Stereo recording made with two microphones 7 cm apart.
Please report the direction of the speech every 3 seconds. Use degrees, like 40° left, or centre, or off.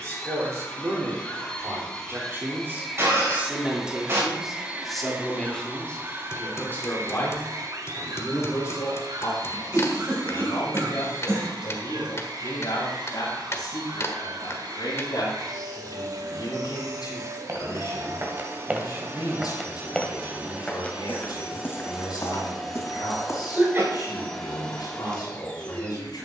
40° right, centre, 30° left, 50° left, 60° left, 70° left, 70° left, 70° left, 70° left.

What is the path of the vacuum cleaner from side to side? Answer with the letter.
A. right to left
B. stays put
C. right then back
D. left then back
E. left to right
C.